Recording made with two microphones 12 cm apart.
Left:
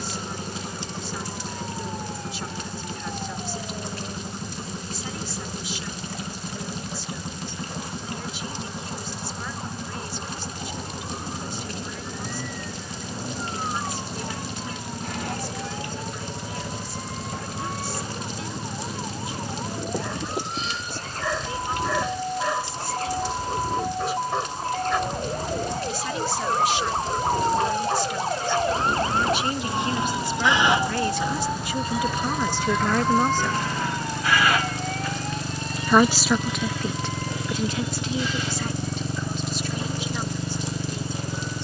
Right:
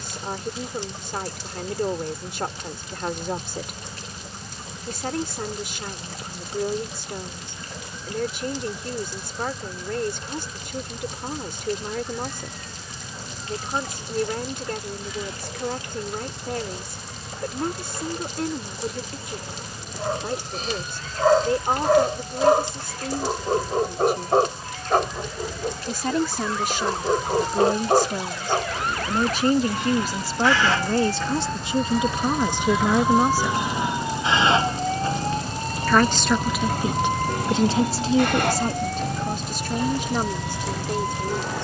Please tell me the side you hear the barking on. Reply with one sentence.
In this clip you hear the barking on the right.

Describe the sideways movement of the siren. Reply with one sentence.
In this clip you hear the siren move to the right.